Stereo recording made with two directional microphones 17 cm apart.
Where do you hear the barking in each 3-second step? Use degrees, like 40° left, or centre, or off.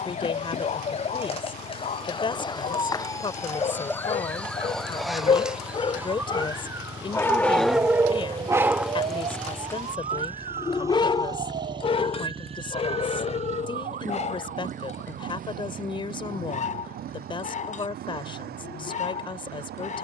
50° left, 40° left, centre, 20° left, 40° left, 50° left, 50° left.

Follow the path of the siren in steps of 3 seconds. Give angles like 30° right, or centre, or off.
30° left, 10° left, 20° right, 40° right, 50° right, 60° right, 60° right.